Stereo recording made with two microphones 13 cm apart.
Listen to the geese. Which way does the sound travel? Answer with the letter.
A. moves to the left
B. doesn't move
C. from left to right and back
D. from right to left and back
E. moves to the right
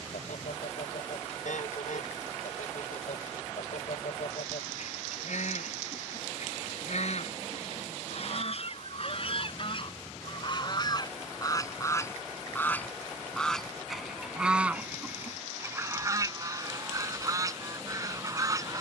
E.